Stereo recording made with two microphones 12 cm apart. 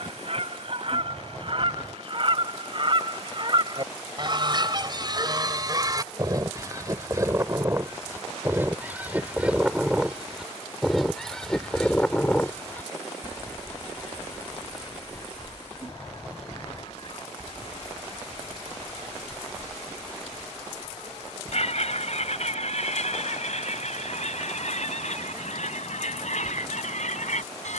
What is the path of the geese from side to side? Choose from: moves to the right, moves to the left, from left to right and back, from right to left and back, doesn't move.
moves to the left.